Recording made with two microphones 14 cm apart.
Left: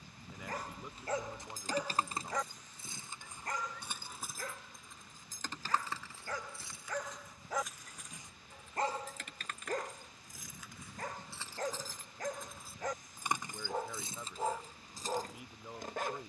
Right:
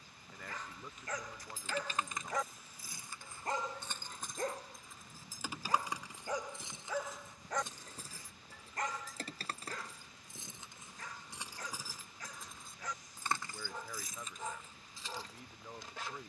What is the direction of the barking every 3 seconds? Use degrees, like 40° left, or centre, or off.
20° left, 30° right, centre, 50° left, 50° left, 50° left.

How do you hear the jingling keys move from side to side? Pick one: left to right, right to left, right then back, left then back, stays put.
right then back.